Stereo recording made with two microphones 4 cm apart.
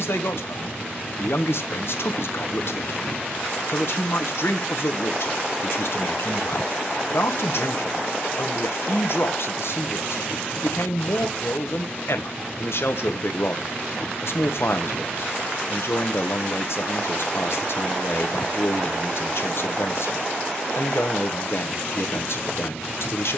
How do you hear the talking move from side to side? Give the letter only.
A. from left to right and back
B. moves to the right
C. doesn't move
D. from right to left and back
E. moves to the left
C.